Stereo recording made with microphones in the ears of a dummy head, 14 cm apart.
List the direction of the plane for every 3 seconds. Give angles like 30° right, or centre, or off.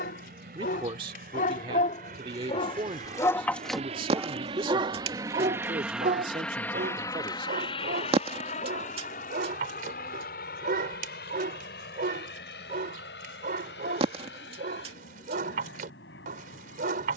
70° right, 40° right, 30° left, 60° left, 70° left, 80° left.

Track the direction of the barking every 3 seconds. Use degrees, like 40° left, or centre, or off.
60° left, 20° right, 60° right, 60° right, 60° right, 60° right.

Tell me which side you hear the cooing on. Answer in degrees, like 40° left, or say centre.
40° right.